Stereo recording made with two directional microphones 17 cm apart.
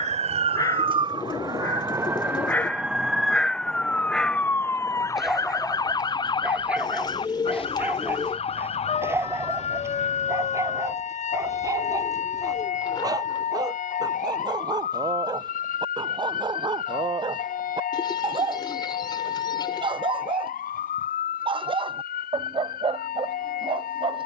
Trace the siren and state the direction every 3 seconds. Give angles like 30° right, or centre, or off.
20° right, 10° left, 30° left, 40° left, 50° left, 50° left, 50° left, 60° left.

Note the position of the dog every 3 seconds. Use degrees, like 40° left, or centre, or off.
20° left, centre, 10° right, 20° right, 20° right, 30° right, 30° right, 30° right.